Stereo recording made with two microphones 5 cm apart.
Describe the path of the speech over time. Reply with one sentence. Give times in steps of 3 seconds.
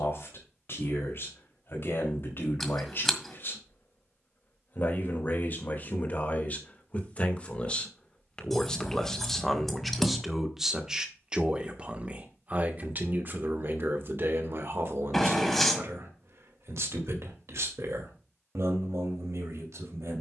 In this clip you hear the speech on the left from 0 s, in the centre from 9 s and on the right from 12 s.